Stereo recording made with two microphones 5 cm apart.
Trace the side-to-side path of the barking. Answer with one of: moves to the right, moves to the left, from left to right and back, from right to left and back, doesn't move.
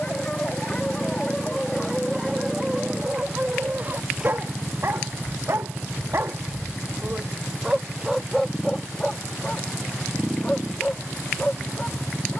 from left to right and back.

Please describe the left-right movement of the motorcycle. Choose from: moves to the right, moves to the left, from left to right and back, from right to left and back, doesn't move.
doesn't move.